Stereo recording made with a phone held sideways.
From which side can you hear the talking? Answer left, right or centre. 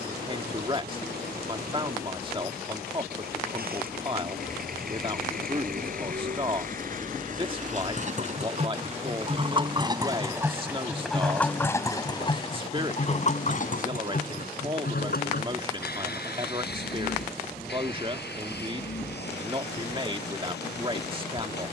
right.